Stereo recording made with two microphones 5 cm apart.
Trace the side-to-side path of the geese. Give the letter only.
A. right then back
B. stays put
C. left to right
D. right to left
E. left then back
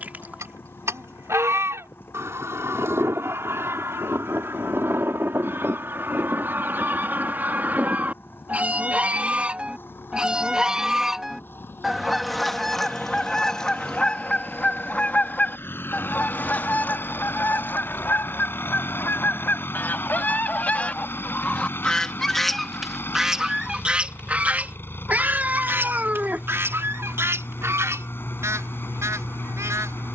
E.